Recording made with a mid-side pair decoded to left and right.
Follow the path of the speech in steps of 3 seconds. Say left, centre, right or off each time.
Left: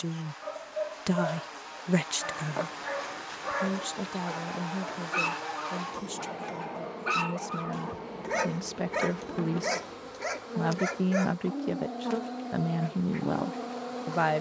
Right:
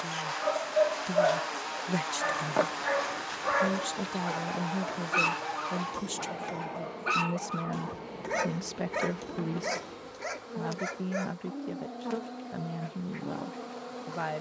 left, centre, centre, left, left.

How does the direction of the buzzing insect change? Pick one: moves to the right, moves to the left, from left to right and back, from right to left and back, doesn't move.
moves to the left.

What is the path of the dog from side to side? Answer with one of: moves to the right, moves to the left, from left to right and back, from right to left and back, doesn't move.
moves to the left.